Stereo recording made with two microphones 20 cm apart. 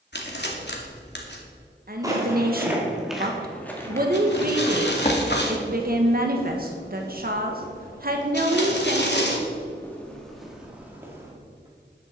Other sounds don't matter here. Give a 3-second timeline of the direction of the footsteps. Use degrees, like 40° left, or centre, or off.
10° right, 20° left, 50° left, centre.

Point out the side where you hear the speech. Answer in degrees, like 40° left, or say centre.
50° right.